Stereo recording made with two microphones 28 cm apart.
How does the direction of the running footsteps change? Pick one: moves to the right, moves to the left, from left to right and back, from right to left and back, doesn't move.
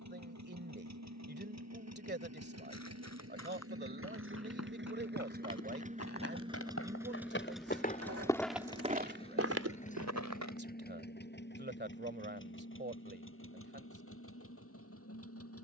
moves to the right.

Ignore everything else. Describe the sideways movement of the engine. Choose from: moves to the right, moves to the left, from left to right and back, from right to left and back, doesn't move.
moves to the left.